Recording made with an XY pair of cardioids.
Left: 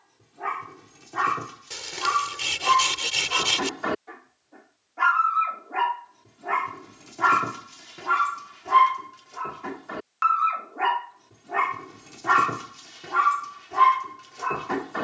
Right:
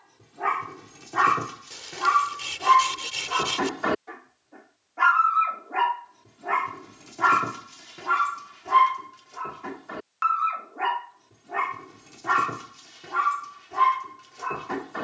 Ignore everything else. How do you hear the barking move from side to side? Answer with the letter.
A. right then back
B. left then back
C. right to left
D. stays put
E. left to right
C.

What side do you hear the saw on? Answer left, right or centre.
left.